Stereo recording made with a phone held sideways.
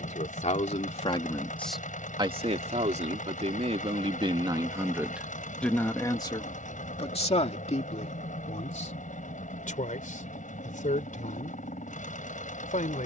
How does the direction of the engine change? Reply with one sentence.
You can hear the engine stay put.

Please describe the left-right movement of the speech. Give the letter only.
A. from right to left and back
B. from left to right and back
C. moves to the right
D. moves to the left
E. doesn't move
B.